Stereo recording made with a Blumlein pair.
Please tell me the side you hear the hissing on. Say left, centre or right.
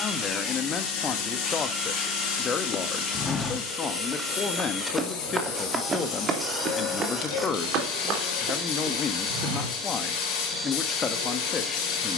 left.